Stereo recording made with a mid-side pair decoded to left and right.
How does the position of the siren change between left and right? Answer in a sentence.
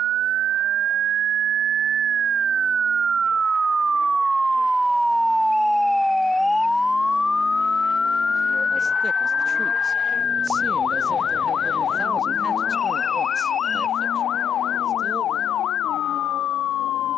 In this clip you hear the siren go from the right side to the left.